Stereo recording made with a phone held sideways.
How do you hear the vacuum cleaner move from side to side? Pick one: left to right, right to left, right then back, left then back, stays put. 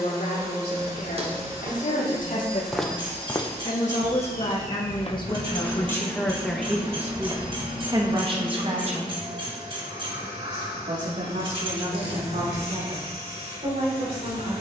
stays put.